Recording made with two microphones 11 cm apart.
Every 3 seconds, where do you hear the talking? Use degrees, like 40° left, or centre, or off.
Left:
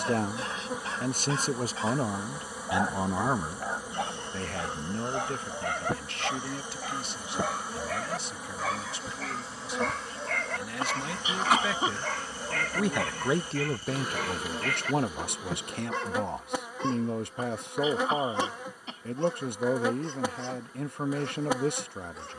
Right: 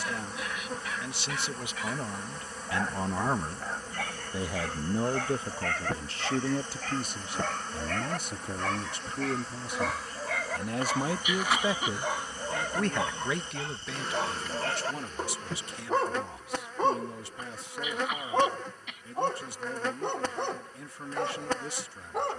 40° left, 10° right, 40° right, 40° right, 40° left, 60° left, 60° left, 60° left.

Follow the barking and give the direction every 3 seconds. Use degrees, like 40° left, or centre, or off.
30° left, 20° left, 10° left, 10° right, 20° right, 40° right, 60° right, 70° right.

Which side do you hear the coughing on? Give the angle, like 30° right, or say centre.
30° left.